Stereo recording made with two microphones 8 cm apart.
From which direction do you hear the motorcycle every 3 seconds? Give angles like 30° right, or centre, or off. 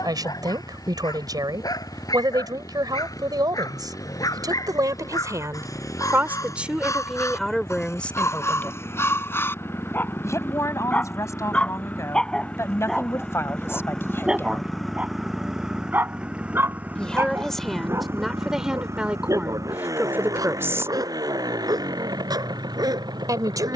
50° left, 50° left, 40° left, 30° left, 10° left, 20° right, 40° right, 60° right.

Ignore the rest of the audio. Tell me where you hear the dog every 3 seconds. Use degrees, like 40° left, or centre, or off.
60° left, 50° left, 40° left, 30° left, centre, 30° right, 50° right, 60° right.